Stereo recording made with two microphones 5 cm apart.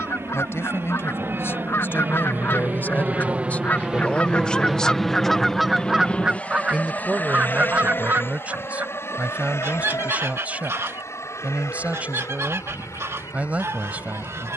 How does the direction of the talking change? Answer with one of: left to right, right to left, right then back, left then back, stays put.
left to right.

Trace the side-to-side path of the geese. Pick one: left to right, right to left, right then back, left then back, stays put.
left to right.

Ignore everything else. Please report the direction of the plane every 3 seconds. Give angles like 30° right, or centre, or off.
50° right, 10° right, 40° left, 60° left, 60° left.